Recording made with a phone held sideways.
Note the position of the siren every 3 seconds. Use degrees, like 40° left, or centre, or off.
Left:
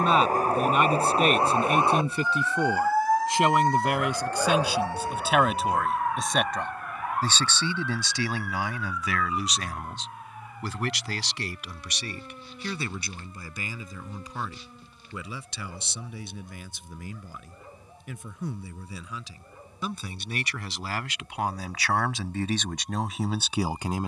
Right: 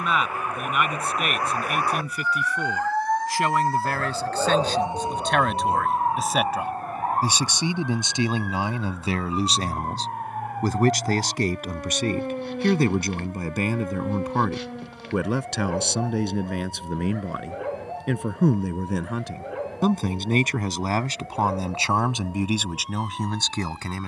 20° left, 10° right, 40° right, 50° right, 60° right, 60° right, 70° right, 70° right.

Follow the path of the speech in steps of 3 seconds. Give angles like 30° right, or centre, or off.
30° left, 10° left, 20° right, 40° right, 60° right, 70° right, 60° right, 10° right.